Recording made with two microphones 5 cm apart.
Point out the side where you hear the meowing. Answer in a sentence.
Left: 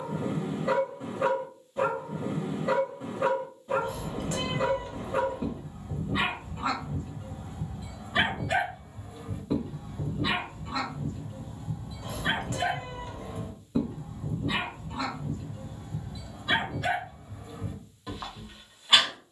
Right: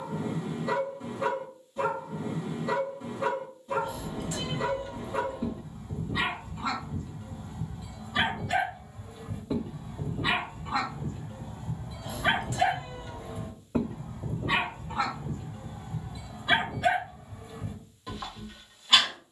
You can hear the meowing on the left.